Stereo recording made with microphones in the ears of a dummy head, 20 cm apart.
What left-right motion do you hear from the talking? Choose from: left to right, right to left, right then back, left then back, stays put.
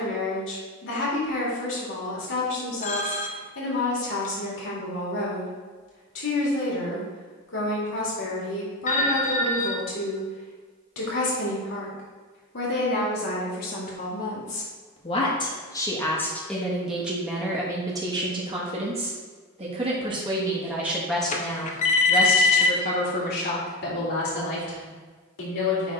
right then back.